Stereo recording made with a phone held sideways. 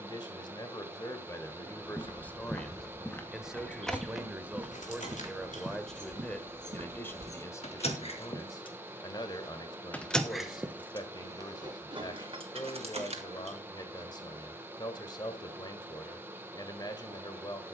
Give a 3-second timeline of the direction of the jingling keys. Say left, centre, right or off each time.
off, left, left, centre, right, off.